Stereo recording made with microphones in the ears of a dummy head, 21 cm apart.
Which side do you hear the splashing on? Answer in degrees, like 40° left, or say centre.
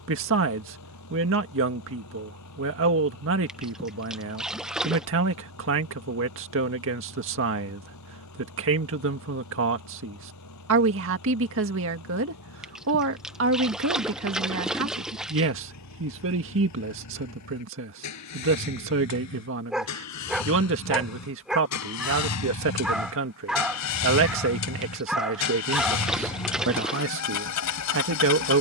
centre.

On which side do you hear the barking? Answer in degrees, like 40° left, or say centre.
centre.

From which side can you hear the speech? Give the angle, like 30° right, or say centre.
60° right.